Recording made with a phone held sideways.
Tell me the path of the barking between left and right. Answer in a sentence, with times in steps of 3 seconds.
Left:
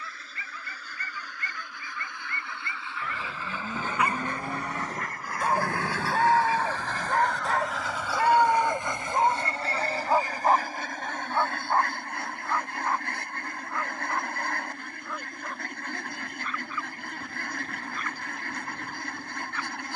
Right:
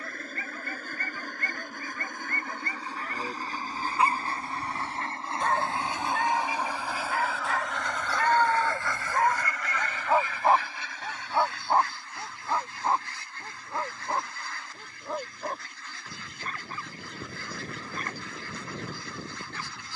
In this clip you hear the barking on the right from 0 s, in the centre from 3 s, on the left from 6 s, in the centre from 9 s and on the right from 12 s.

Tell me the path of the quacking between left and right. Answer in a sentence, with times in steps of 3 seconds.
You can hear the quacking on the right from 0 s, in the centre from 6 s and on the left from 9 s.